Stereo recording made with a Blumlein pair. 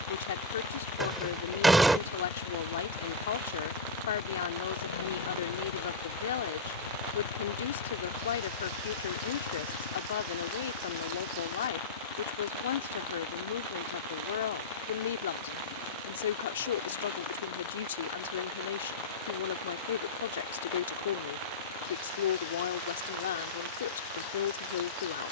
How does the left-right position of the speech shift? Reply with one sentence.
In this clip you hear the speech stay in one place.